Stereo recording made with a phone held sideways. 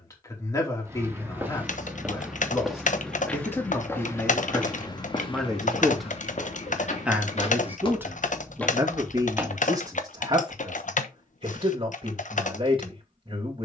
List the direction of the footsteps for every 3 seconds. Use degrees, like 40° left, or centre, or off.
10° right, 20° left, 40° left, 10° right, off.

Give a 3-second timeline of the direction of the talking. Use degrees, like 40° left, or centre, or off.
20° left, 10° left, 10° right, 30° right, 40° right.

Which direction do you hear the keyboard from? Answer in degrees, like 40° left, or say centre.
50° left.